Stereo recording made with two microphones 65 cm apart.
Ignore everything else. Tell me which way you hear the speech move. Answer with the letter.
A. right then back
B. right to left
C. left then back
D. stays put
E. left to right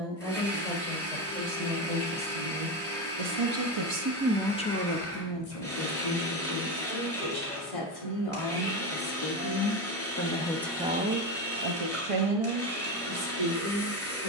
C.